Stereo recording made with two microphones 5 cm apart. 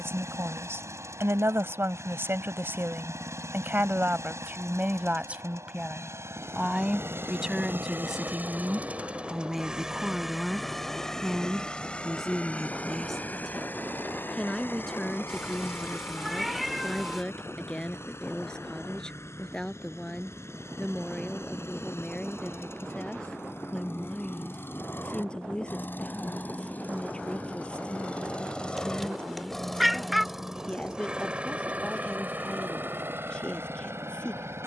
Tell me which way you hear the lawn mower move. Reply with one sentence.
You can hear the lawn mower move from right to left and back again.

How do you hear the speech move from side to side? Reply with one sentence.
In this clip you hear the speech move to the left.